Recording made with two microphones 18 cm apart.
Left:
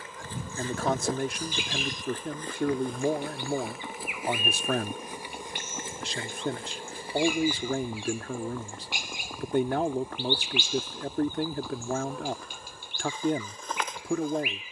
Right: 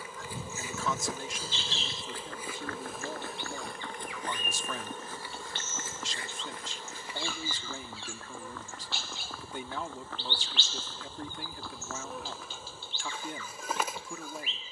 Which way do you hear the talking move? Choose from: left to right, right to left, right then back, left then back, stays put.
stays put.